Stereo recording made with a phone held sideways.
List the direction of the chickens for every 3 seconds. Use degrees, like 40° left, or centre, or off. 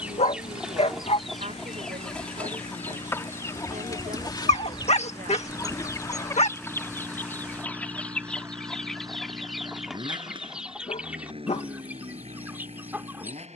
centre, 30° left, 10° left, 10° right, 10° right.